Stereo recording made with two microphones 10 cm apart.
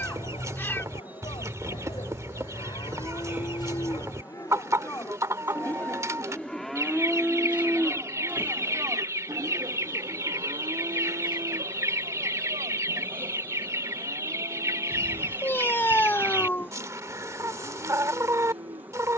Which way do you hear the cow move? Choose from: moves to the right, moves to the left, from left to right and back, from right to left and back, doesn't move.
moves to the right.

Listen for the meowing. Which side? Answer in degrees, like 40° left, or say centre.
20° left.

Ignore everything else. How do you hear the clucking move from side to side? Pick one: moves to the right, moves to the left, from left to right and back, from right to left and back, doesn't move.
doesn't move.